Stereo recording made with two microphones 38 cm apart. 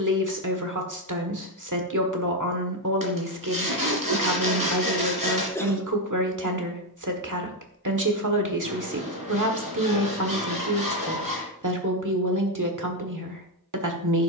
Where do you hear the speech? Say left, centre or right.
right.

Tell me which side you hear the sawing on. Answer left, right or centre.
right.